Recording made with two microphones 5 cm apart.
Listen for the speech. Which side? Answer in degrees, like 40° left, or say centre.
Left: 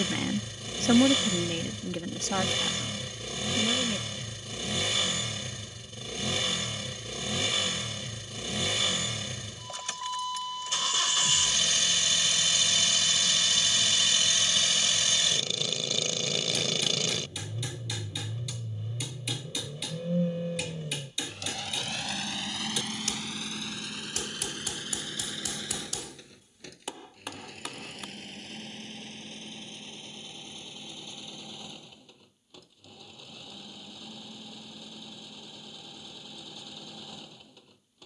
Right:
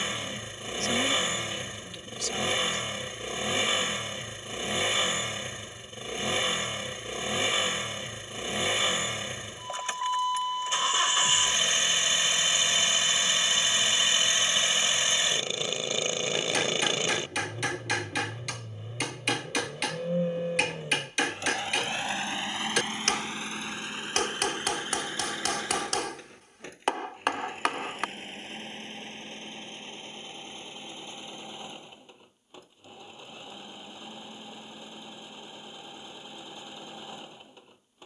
40° left.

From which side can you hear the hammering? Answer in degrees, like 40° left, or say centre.
60° right.